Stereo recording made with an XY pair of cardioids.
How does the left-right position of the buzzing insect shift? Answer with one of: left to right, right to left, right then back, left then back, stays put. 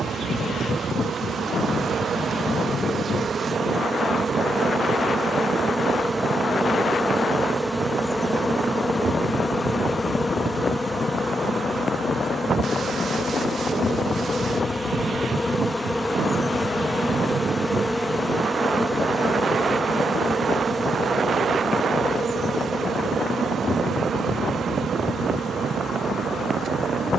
left then back.